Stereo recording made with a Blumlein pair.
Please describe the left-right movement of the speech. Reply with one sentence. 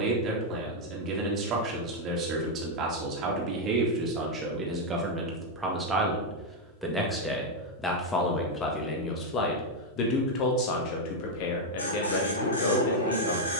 In this clip you hear the speech travel towards the left.